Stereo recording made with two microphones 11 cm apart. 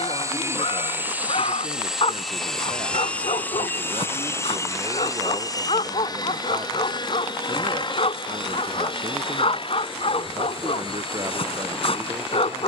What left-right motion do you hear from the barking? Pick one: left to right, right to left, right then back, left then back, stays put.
stays put.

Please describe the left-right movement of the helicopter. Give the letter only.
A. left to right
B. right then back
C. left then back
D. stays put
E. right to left
E.